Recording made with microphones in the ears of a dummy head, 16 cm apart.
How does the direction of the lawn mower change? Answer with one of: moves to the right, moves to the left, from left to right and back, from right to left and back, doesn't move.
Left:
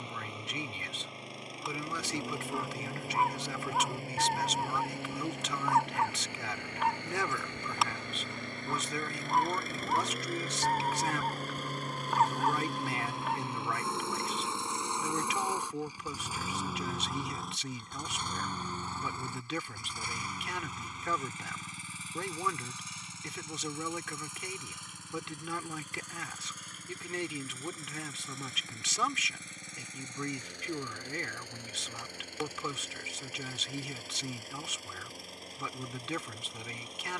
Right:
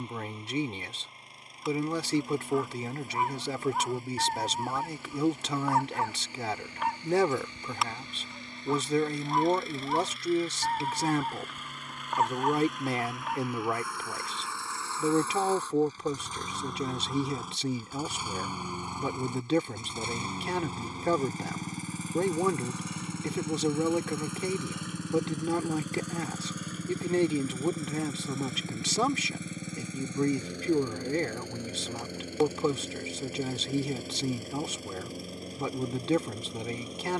moves to the right.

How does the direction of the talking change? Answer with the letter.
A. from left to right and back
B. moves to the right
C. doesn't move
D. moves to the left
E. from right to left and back
C.